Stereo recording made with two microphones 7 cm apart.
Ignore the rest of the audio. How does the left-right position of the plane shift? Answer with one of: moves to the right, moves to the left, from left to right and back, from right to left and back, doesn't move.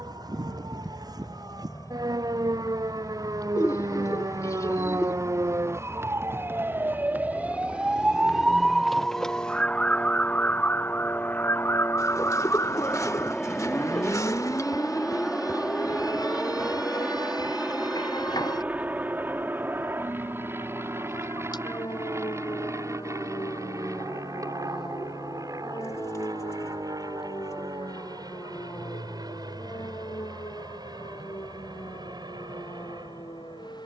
moves to the right.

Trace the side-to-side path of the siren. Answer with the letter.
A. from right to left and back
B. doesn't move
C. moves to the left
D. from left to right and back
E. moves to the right
C.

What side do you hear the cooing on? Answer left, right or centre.
left.